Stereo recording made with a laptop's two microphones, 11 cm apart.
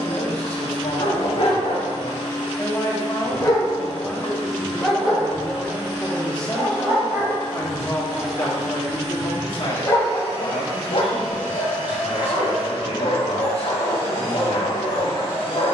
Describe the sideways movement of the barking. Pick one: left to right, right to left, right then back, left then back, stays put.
right then back.